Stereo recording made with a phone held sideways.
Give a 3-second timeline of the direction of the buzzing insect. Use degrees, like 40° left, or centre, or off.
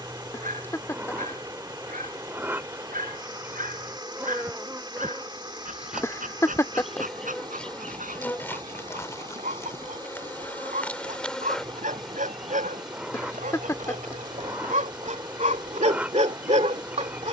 10° right, 10° right, 10° left, 10° left, 10° right, 10° right.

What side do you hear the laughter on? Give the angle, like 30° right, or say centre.
20° left.